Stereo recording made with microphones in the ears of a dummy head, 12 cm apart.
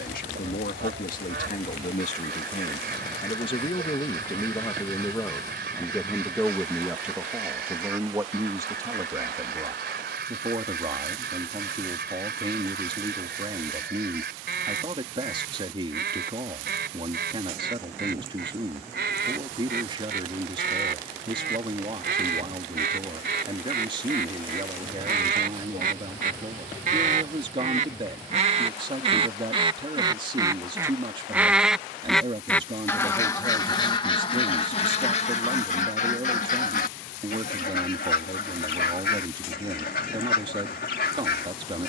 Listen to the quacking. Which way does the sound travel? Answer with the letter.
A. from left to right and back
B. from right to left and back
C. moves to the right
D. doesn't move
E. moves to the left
E.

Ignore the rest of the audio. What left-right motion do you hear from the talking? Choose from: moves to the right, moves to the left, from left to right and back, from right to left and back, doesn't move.
moves to the right.